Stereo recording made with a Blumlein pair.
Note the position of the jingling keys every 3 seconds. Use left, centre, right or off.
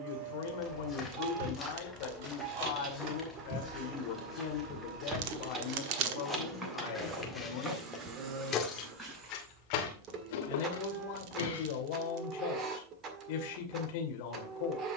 right, right, centre, left, off.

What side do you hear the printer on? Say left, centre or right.
right.